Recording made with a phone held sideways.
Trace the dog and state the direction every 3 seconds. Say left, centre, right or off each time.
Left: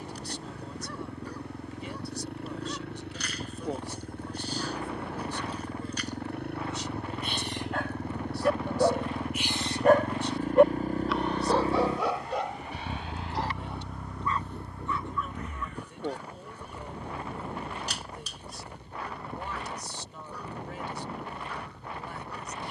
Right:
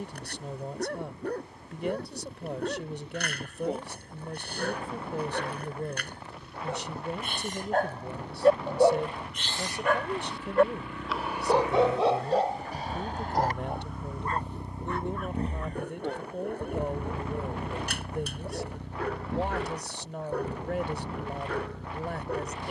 right, right, right, centre, right, right, right, right.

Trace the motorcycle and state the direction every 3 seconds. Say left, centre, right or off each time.
left, left, left, left, centre, right, right, right.